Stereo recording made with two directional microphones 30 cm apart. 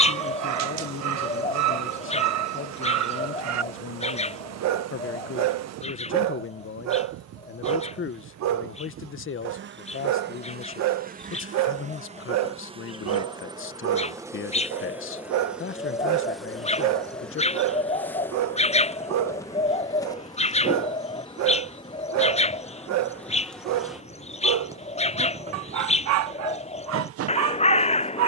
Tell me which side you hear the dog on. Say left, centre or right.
right.